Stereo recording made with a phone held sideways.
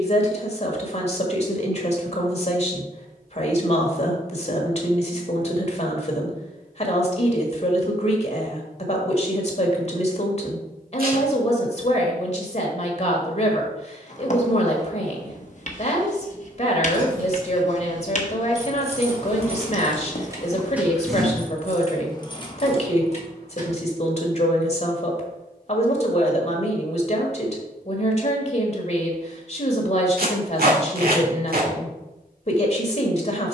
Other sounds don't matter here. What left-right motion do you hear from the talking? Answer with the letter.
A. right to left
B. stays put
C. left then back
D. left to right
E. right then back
B.